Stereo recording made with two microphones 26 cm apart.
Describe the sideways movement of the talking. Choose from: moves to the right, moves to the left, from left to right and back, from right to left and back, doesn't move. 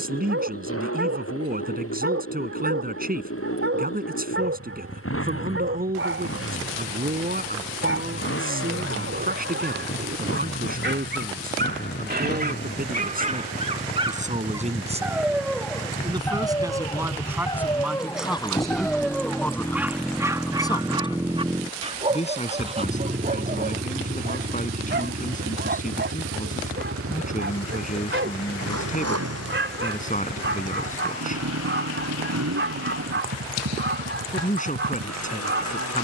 moves to the left.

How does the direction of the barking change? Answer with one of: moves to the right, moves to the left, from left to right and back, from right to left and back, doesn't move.
from right to left and back.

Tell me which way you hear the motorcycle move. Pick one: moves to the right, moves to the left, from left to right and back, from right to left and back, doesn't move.
moves to the right.